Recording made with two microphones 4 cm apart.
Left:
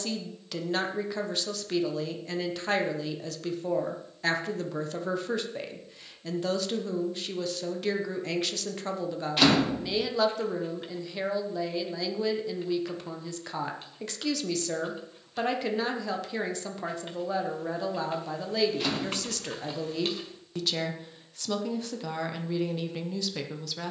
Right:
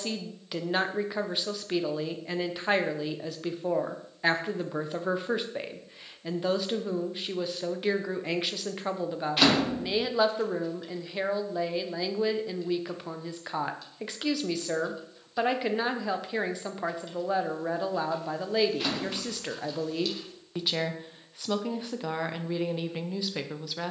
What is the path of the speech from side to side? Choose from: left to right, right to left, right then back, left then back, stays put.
stays put.